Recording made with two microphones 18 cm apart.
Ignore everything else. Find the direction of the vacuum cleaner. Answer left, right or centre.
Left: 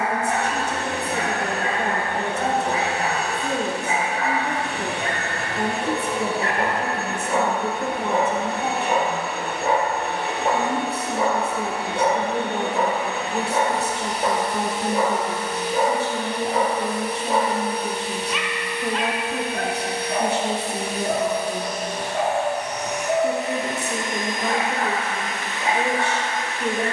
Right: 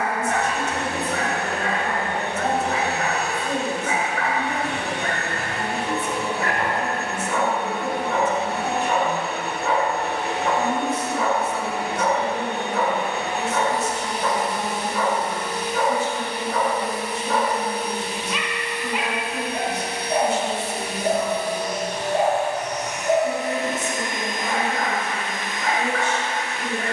right.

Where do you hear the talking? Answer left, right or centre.
left.